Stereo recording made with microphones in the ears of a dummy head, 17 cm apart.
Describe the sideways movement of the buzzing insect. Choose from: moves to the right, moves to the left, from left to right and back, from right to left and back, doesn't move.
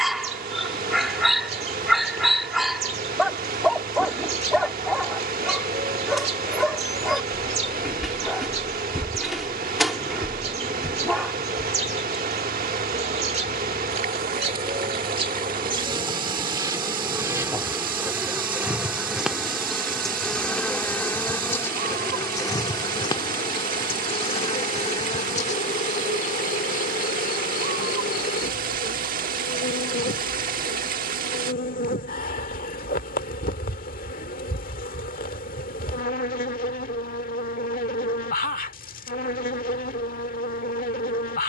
moves to the left.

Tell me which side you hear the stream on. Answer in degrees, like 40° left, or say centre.
40° right.